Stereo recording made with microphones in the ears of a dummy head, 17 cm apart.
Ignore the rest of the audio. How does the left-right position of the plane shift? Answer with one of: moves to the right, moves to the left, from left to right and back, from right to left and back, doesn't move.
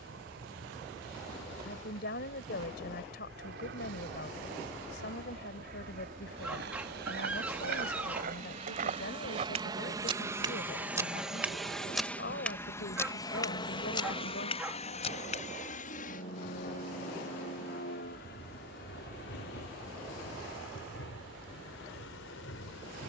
moves to the left.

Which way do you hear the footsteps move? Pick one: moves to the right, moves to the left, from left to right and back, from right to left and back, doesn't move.
moves to the left.